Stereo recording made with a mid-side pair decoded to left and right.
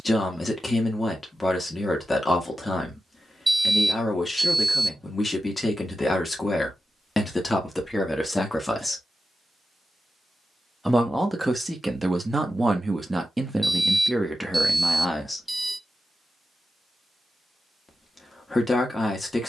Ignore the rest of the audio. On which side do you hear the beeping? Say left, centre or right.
centre.